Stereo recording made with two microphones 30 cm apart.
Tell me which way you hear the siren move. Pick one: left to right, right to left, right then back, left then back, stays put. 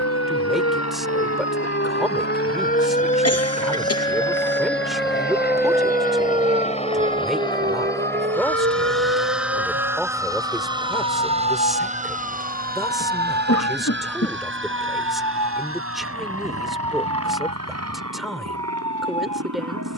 left to right.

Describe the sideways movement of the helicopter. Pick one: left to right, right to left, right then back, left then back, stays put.
left to right.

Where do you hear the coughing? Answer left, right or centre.
left.